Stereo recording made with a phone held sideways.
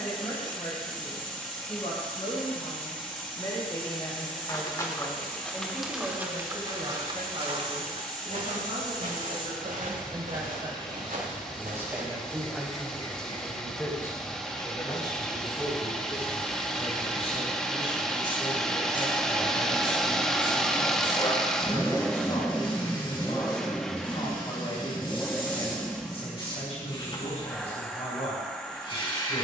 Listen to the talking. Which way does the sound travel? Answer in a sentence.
In this clip you hear the talking go right and come back.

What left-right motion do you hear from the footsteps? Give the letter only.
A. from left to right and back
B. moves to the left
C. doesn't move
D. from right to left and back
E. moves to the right
E.